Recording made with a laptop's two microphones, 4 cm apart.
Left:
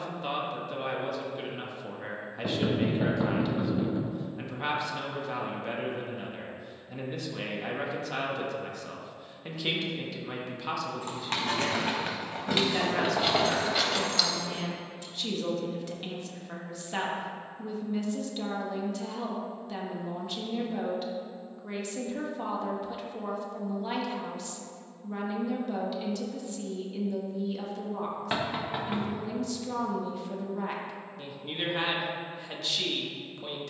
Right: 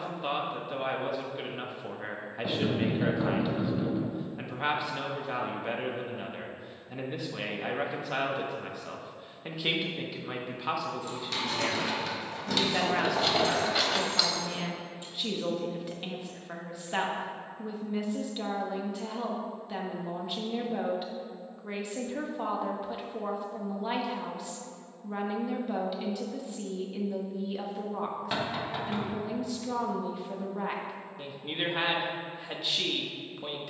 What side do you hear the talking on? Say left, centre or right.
centre.